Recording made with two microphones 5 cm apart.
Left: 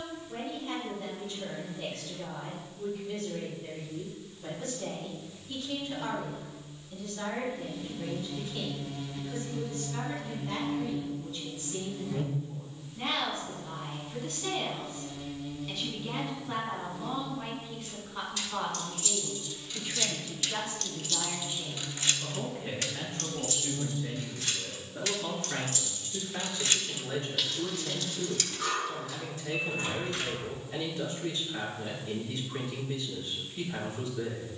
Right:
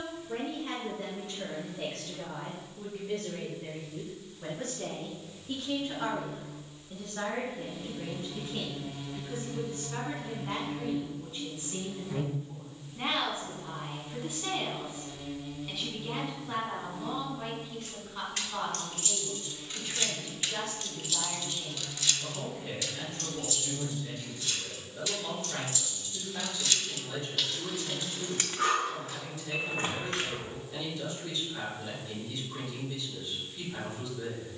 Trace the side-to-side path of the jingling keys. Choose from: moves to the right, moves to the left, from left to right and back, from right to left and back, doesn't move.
from right to left and back.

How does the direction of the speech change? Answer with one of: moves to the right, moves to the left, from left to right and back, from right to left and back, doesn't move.
moves to the left.